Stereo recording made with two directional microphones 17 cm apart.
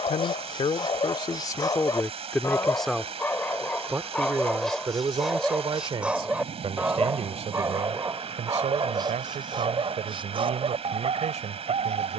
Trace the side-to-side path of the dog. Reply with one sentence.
You can hear the dog move to the right.